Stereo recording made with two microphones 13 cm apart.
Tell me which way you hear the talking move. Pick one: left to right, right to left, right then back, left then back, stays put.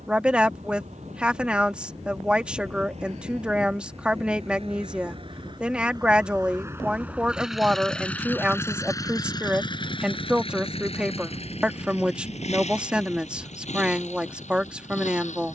stays put.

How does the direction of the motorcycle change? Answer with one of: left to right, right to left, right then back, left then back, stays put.
right to left.